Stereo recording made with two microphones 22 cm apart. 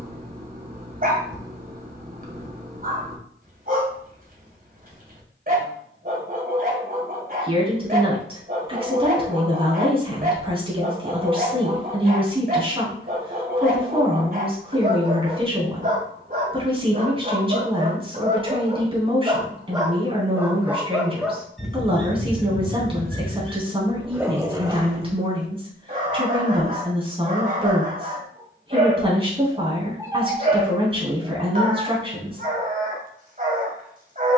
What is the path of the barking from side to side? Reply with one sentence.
You can hear the barking move from right to left and back again.